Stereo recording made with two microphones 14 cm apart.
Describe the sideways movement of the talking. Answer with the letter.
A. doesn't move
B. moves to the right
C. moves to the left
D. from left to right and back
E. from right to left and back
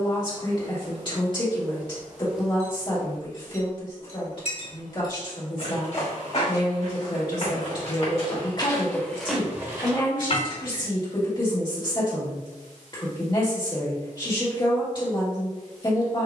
A.